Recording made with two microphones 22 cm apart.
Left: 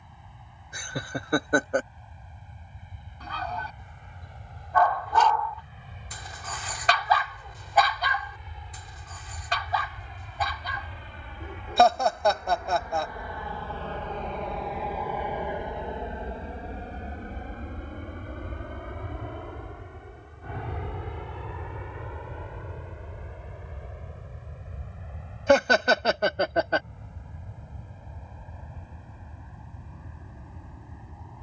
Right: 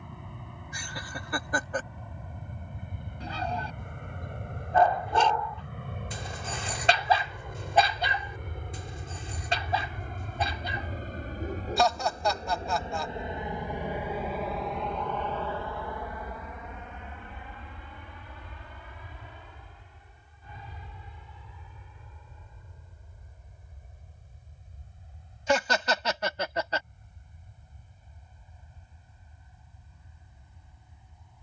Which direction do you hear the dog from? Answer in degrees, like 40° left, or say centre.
30° right.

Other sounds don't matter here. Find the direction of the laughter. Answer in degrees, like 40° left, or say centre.
60° left.